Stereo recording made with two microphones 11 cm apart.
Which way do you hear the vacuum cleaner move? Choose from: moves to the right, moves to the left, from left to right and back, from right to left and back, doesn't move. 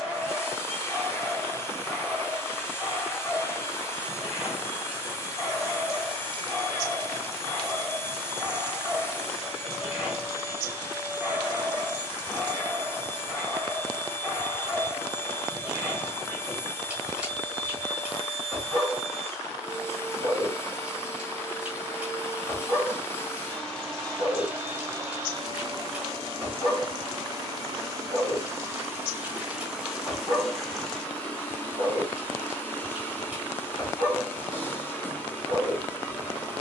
from left to right and back.